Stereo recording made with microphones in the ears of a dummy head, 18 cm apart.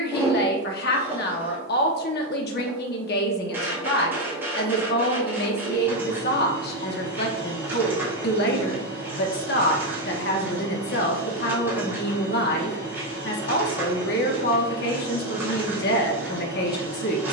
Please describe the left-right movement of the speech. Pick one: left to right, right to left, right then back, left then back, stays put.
stays put.